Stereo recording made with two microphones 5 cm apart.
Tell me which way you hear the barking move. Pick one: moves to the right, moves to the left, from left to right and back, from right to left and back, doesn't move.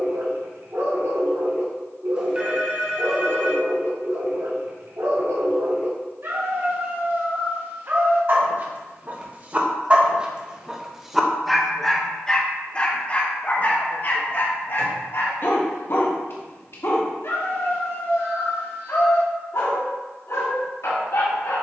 moves to the left.